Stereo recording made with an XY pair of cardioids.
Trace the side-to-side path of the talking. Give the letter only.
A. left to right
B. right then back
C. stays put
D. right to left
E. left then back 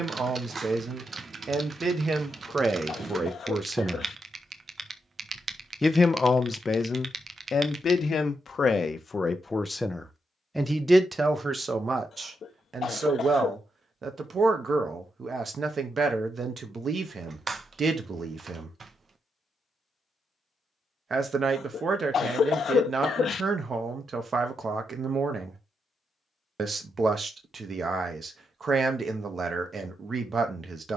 E.